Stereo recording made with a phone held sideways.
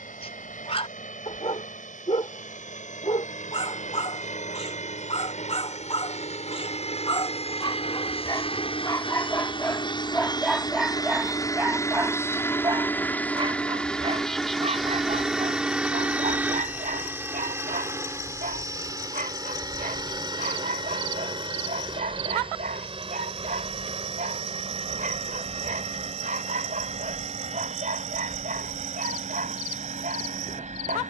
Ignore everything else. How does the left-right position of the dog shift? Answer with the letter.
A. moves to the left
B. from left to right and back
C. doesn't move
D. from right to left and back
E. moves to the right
E.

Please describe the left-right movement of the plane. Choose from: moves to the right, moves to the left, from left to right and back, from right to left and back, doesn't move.
moves to the right.